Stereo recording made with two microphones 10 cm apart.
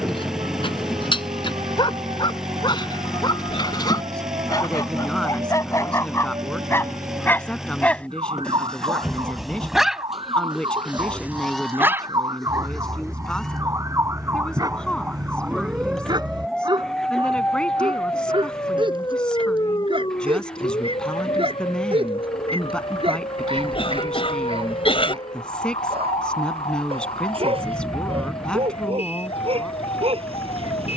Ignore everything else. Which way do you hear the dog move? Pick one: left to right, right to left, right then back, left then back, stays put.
left to right.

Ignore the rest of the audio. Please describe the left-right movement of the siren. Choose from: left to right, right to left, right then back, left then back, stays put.
right to left.